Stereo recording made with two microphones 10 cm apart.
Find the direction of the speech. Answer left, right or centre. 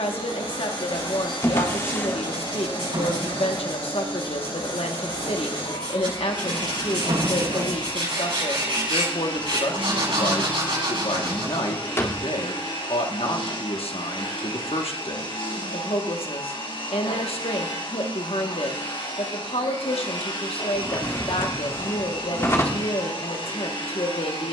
left.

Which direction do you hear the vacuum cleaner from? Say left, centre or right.
left.